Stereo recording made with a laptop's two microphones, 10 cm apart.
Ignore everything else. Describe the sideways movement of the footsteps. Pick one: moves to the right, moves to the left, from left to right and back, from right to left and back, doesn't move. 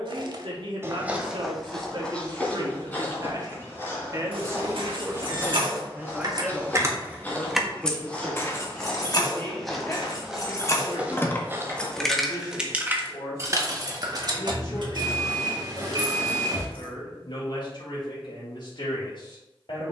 from right to left and back.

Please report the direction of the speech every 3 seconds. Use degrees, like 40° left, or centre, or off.
60° right, 30° right, centre, 30° left, 40° left, 50° left, 60° left.